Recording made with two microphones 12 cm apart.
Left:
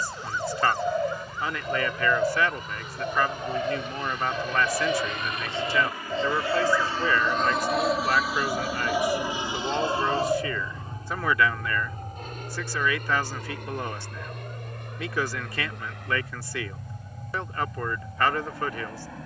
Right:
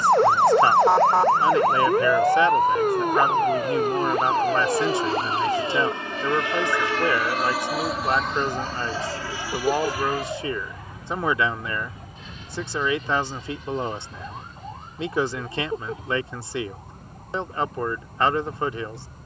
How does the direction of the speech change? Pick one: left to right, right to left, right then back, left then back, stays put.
stays put.